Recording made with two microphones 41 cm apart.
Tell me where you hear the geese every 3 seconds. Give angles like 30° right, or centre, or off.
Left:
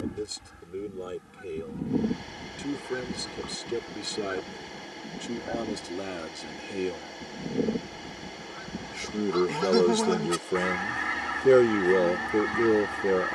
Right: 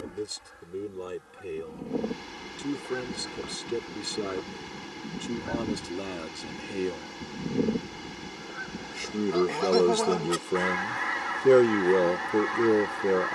30° left, 10° right, 10° right, 40° left, 40° left.